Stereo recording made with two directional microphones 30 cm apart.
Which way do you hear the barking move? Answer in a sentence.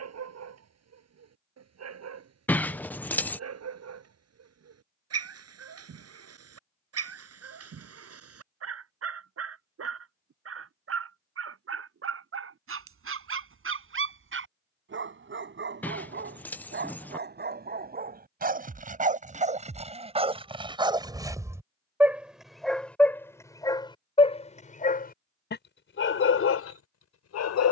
In this clip you hear the barking move to the left.